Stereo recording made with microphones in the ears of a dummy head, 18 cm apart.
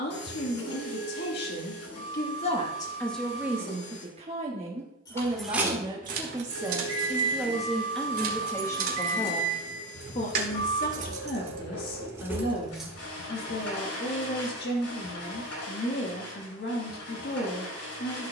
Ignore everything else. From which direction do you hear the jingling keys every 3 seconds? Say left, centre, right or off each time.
off, centre, right, right, centre, off.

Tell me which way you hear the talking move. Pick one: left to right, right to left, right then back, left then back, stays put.
right then back.